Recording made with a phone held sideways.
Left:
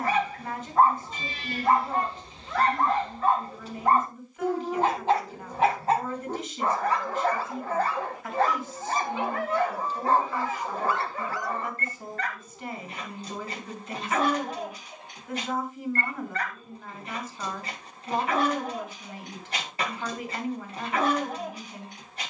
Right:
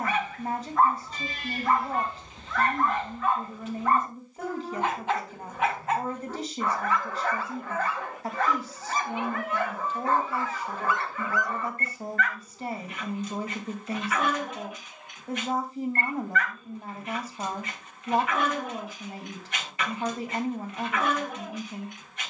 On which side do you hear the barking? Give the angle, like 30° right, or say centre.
30° left.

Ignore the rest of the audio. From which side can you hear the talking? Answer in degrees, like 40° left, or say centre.
40° right.